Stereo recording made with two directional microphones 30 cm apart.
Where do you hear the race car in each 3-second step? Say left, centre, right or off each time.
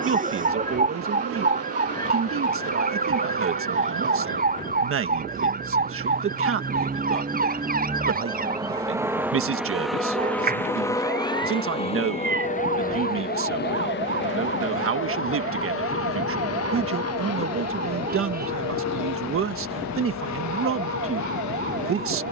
right, right, right, centre, left, left, left, left.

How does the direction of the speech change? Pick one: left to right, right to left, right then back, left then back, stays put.
stays put.